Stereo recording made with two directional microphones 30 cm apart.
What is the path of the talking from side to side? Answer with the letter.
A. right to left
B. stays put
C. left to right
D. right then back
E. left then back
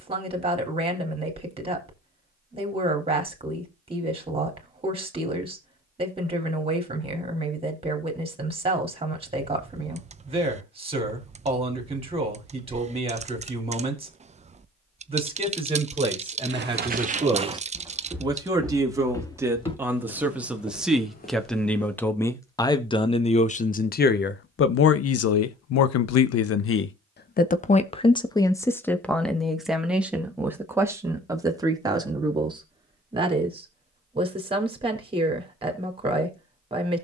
E.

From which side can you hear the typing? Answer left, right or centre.
right.